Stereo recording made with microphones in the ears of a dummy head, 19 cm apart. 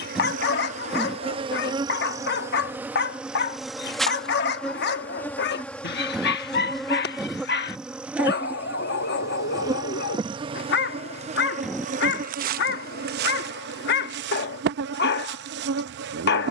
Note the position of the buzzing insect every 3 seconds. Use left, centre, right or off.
right, centre, centre, right, right, right.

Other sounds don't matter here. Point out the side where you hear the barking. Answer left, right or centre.
left.